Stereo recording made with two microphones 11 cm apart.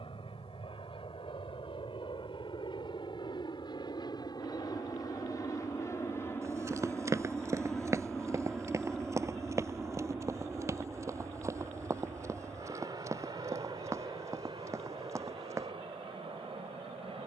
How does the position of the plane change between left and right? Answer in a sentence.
In this clip you hear the plane go from the left side to the right.